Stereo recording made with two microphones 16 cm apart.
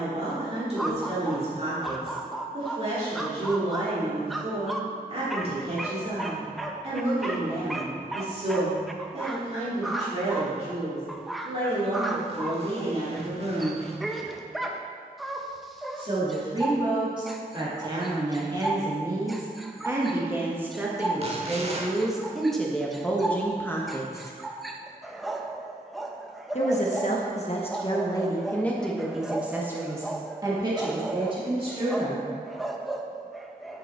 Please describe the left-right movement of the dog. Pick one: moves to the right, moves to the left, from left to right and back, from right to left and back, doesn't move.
doesn't move.